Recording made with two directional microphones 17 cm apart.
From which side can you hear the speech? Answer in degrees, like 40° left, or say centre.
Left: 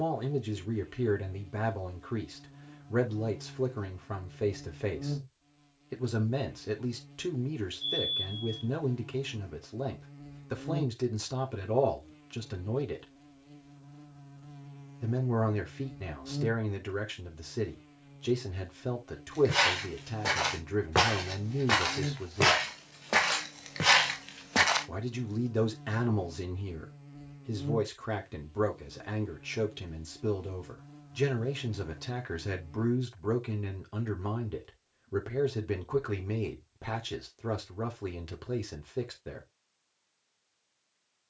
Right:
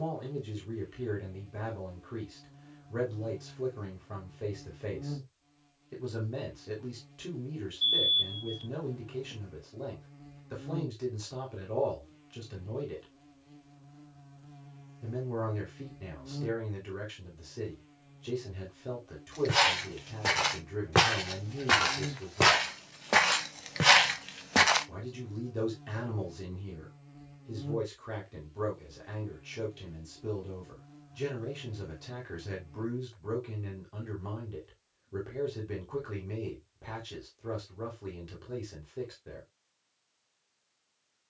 50° left.